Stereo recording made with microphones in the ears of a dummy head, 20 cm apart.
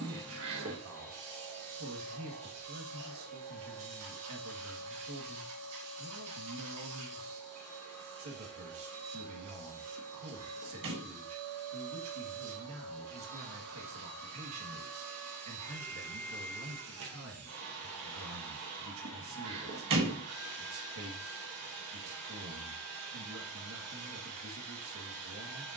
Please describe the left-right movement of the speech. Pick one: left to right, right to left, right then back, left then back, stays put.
stays put.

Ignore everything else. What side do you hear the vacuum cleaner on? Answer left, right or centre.
right.